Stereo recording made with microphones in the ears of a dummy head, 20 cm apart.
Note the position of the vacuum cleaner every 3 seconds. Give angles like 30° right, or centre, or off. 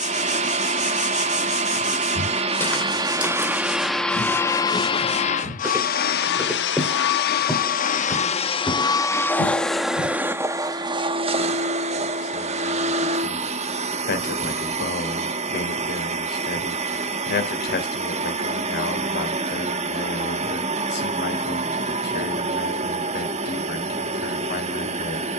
30° right, 10° left, 40° left, 10° right, 30° right, 30° right, 30° right, 30° right, 30° right.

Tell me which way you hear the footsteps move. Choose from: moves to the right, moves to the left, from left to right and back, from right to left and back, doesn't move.
from left to right and back.